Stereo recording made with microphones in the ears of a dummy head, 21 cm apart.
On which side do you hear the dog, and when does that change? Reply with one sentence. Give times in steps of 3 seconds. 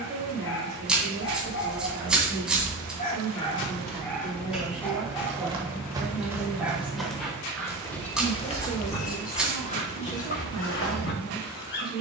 You can hear the dog on the left from 0 s, in the centre from 3 s and on the left from 9 s.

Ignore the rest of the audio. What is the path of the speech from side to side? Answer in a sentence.
You can hear the speech go from the right side to the left.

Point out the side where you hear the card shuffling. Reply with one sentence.
You can hear the card shuffling in the centre.